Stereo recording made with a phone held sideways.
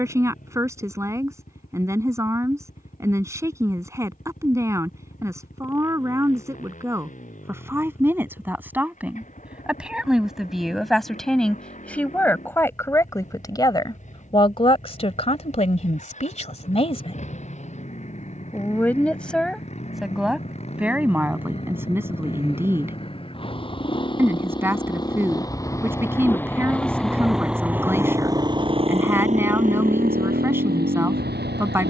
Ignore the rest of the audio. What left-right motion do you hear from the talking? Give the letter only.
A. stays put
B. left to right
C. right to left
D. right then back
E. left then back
E.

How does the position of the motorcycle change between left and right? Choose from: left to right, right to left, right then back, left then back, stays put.
left to right.